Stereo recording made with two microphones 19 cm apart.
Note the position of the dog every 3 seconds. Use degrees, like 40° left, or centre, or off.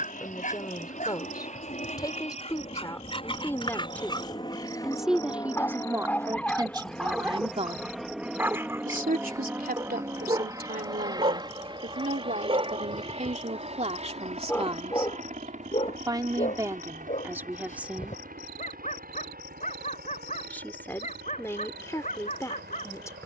40° left, 20° left, centre, 30° right, 10° right, 40° left, 50° left, 50° left.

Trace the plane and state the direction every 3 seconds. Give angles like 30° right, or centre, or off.
40° left, 30° left, centre, 20° right, 30° right, 40° right, 50° right, 60° right.